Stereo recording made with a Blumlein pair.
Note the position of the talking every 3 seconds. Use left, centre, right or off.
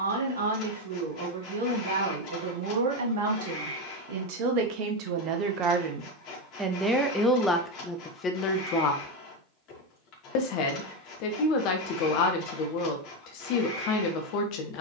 right, right, centre, left, left.